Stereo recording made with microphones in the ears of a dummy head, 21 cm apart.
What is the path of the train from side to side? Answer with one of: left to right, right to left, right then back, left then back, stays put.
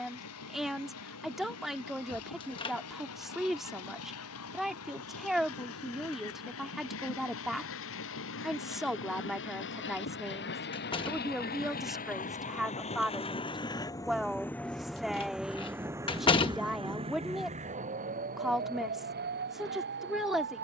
left to right.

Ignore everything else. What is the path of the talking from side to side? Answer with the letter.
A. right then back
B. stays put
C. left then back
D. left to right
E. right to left
B.